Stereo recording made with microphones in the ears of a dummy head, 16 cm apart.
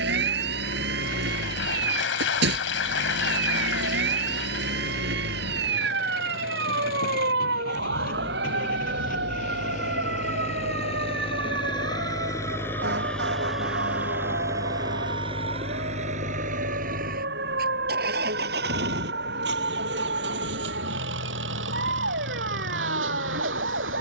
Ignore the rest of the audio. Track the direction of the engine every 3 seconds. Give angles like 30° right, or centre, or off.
70° left, 60° left, 50° left, 40° left, centre, 40° right, 70° right, 80° right.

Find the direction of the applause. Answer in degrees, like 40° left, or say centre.
80° left.